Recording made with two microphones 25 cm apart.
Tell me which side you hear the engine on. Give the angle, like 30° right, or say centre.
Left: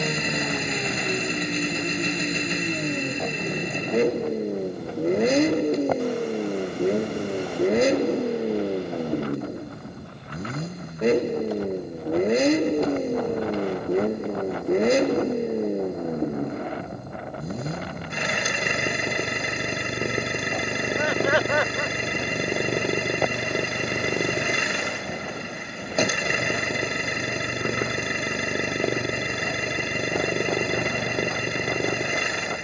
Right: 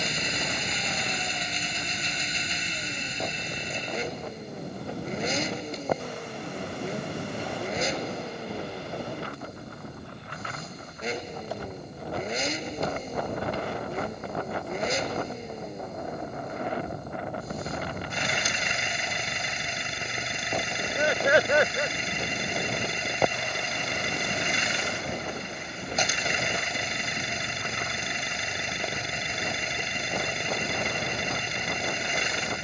60° left.